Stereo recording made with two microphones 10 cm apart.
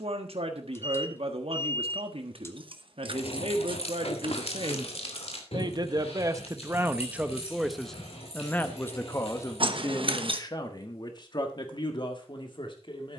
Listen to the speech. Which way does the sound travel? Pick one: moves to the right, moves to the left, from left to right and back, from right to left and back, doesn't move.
moves to the left.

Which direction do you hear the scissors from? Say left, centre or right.
right.